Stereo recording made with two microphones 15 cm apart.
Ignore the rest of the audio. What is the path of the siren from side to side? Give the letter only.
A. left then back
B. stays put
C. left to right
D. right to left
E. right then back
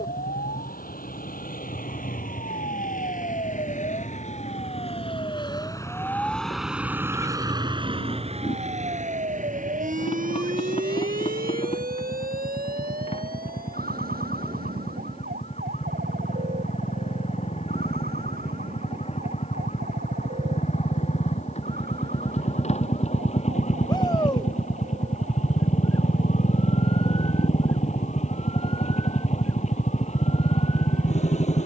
C.